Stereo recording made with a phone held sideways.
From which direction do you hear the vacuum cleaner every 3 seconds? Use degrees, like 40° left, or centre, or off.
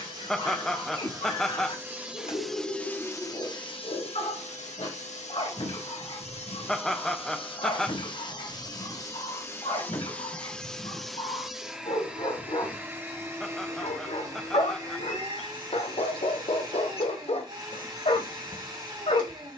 20° right, 50° left, 40° left, 10° left, 20° right, 30° right, 30° right.